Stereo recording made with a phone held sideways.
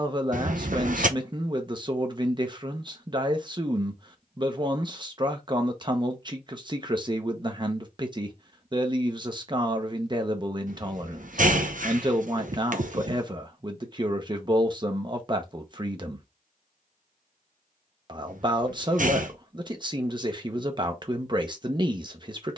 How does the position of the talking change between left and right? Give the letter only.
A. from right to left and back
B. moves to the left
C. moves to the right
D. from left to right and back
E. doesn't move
E.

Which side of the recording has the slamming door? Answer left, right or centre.
right.